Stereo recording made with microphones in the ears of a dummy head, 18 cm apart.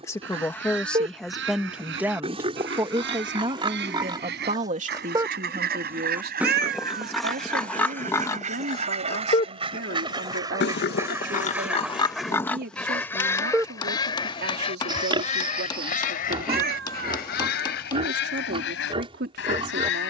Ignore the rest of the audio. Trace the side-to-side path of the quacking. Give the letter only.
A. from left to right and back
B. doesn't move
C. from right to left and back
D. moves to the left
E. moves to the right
D.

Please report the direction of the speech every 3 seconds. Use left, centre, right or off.
centre, right, right, right, right, right, right.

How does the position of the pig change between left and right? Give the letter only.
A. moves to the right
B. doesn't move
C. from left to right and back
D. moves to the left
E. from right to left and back
E.